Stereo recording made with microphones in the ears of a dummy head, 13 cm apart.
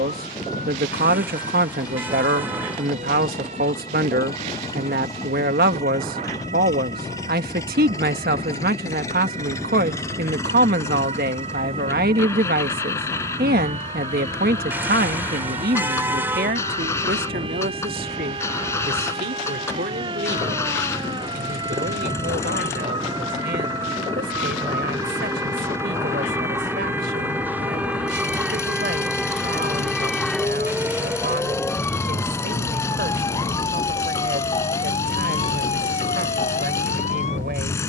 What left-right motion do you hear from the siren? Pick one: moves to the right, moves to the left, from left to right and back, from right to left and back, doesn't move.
moves to the left.